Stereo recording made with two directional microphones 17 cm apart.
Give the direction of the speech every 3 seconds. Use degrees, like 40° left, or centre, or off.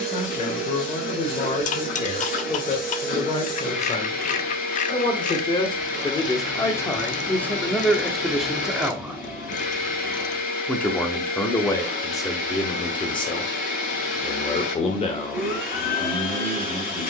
40° left, 30° left, 10° left, 10° left, 30° left, 40° left.